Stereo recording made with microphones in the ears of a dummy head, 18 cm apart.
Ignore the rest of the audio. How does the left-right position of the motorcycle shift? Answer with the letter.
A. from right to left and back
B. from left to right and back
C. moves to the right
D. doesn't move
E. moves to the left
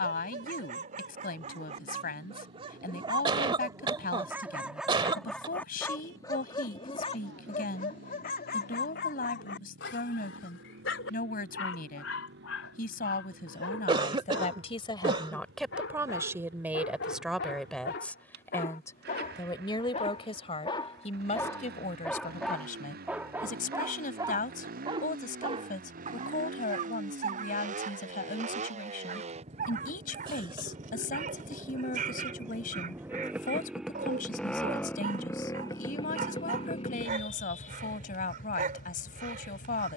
E.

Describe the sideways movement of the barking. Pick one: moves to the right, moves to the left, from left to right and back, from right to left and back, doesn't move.
from right to left and back.